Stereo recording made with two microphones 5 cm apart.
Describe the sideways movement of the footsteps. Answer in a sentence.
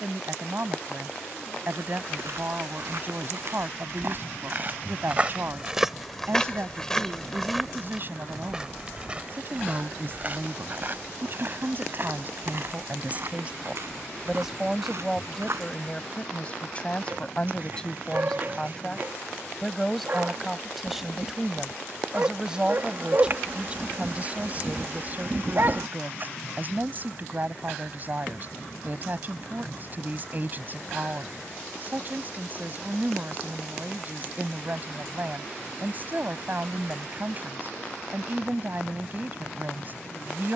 In this clip you hear the footsteps move from right to left and back again.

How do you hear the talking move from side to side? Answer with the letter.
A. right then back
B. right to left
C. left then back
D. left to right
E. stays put
C.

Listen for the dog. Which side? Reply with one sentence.
You can hear the dog on the right.